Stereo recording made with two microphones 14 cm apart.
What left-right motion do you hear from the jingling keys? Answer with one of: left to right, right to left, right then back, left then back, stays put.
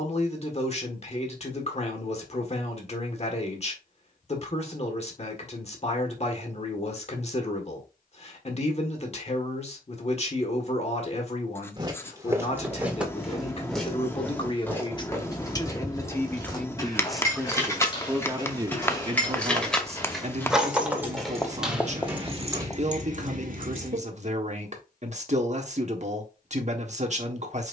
left to right.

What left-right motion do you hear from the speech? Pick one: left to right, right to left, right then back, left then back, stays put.
left to right.